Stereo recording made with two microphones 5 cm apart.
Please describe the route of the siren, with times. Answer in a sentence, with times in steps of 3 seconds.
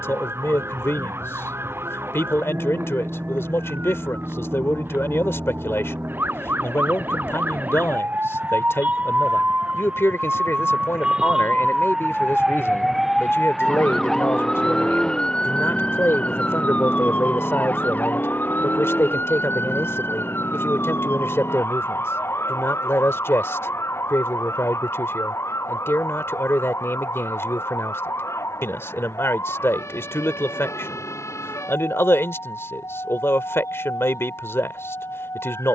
In this clip you hear the siren on the right from 0 s, in the centre from 12 s and on the left from 15 s.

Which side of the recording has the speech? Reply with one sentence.
You can hear the speech on the left.